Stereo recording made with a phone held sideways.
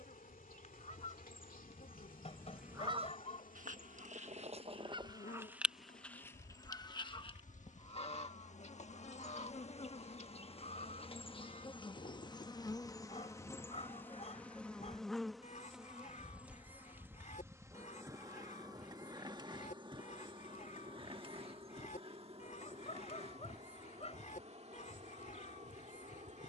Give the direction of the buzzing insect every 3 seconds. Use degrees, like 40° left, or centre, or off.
80° left, 70° left, 60° left, 40° left, 20° left, 10° right, 30° right, 40° right, 50° right.